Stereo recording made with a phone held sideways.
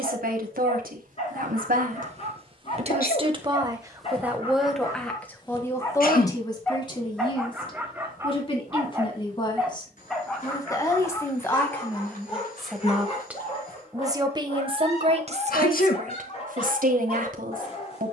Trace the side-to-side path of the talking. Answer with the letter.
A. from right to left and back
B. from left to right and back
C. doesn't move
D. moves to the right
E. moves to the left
A.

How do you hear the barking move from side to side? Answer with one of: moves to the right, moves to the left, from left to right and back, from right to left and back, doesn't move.
from left to right and back.